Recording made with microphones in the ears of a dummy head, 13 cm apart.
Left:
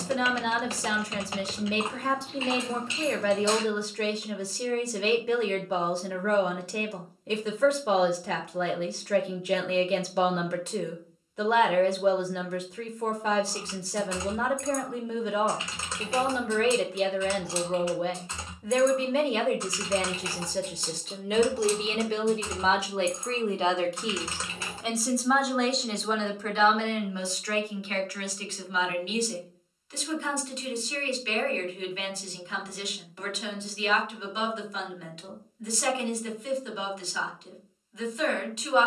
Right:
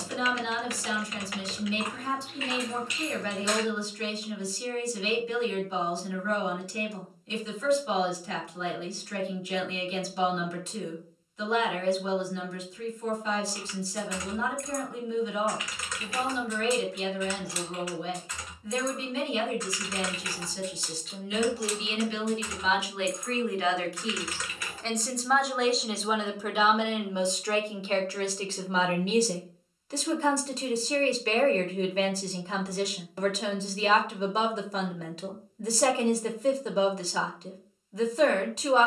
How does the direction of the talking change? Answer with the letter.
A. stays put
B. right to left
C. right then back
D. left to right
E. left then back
D.